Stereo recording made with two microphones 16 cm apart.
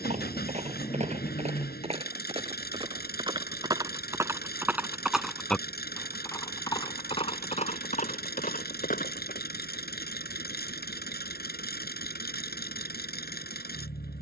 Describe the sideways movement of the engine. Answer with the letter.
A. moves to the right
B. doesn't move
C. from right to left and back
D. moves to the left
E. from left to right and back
B.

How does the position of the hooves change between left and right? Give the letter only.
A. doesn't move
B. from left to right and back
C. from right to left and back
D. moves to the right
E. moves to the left
E.